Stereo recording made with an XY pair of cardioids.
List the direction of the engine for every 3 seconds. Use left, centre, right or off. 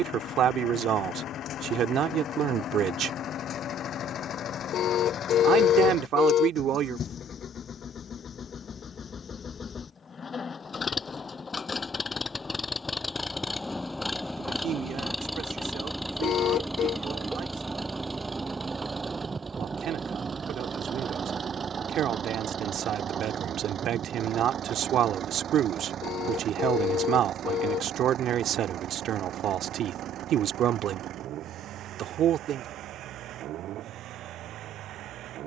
left, left, left, left, centre, centre, right, right, right, right, right, right.